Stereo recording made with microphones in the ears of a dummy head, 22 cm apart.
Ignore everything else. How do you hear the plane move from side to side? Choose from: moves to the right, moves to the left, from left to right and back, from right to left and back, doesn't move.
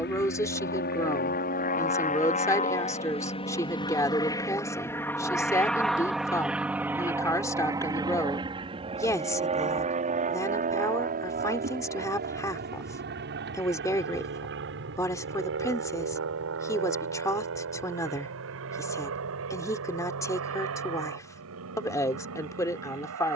moves to the right.